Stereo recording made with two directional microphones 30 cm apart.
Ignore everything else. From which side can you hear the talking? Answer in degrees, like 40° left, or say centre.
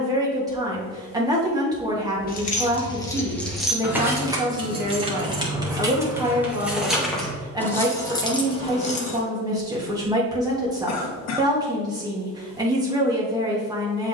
10° right.